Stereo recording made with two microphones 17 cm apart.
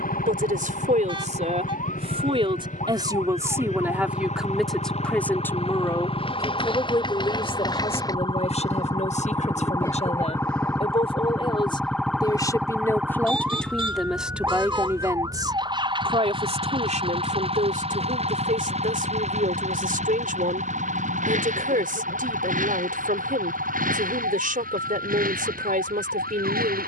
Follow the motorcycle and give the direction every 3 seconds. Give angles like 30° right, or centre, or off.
50° left, 40° left, 20° left, 10° left, 10° right, 30° right, 40° right, 50° right, 50° right.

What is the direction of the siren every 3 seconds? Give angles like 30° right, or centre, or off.
50° left, 40° left, 30° left, 10° left, 10° right, 30° right, 50° right, 60° right, 70° right.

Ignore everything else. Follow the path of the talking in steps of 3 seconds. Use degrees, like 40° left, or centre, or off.
40° right, centre, 30° left, 40° left, 10° left, 40° right, 50° right, 50° right, 50° right.